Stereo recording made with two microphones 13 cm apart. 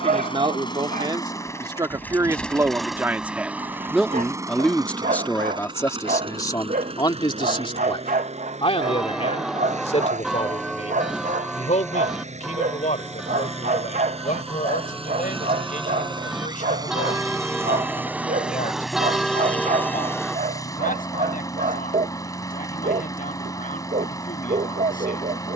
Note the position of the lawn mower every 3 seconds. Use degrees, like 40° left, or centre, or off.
20° left, 20° right, 50° right, 60° right, 50° right, 30° right, 10° left, 20° left, 20° left.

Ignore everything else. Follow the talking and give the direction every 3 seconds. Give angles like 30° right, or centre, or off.
30° right, centre, 30° left, 50° left, 60° left, 70° left, 70° left, 80° left, 80° left.